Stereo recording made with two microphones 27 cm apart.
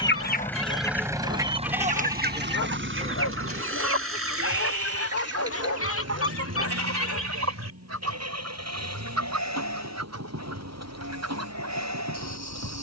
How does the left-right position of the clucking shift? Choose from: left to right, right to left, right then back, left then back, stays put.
left to right.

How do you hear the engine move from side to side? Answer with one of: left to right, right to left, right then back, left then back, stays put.
left to right.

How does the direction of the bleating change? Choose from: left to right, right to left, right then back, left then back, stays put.
left to right.